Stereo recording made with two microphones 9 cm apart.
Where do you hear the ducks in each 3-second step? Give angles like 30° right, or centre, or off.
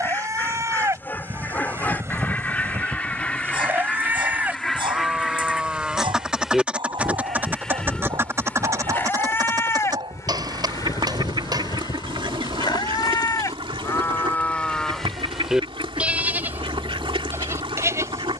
20° left, 10° left, 20° right, 50° right, 80° right, 80° right.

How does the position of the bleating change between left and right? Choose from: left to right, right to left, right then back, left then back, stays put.
left then back.